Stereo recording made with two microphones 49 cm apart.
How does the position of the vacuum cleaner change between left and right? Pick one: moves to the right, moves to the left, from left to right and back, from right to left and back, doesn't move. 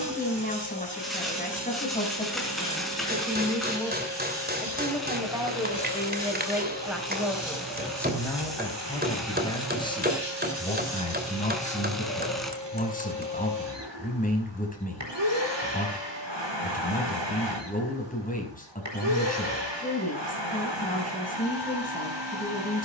doesn't move.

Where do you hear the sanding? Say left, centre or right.
centre.